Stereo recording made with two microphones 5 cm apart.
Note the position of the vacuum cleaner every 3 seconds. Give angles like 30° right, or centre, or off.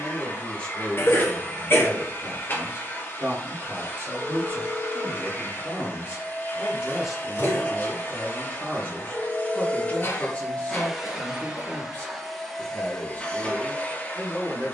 40° left, 40° left, 40° left, 10° left, 20° left.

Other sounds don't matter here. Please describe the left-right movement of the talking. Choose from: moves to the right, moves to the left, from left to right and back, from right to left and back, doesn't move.
from left to right and back.